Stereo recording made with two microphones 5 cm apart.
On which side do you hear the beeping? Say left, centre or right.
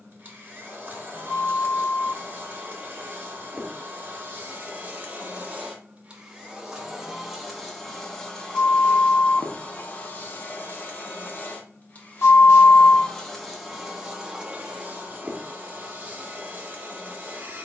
left.